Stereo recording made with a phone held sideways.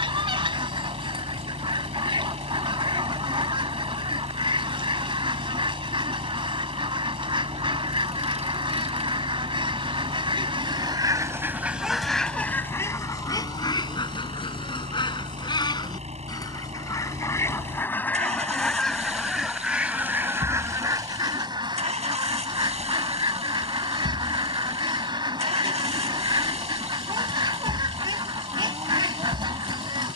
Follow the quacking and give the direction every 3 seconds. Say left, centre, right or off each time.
right, right, right, right, left, left, centre, right, right, right.